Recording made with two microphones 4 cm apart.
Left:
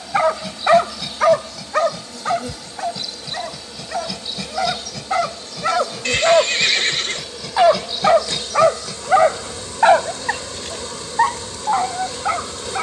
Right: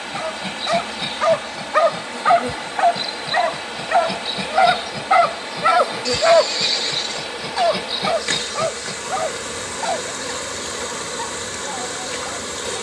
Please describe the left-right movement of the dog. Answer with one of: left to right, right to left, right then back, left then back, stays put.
right then back.